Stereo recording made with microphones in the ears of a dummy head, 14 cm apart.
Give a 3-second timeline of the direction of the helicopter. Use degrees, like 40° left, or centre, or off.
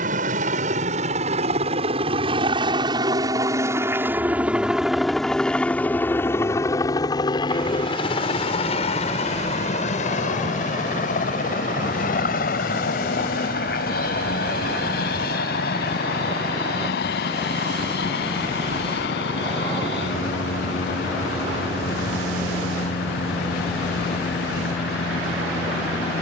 40° right, 10° right, 30° left, 50° left, 60° left, 60° left, 70° left, 70° left, 70° left.